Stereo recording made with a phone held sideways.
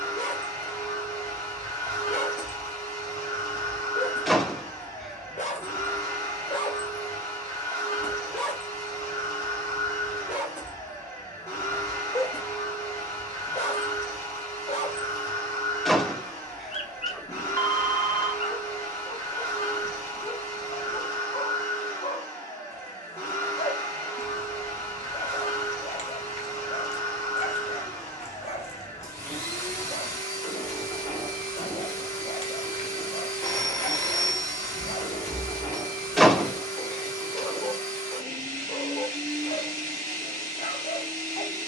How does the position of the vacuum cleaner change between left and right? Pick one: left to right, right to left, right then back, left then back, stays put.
stays put.